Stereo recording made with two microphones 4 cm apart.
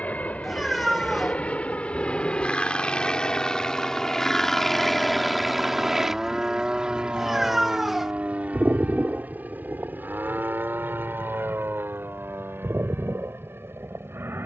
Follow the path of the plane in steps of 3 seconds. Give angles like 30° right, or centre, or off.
30° left, 10° left, 30° right, 50° right, 60° right.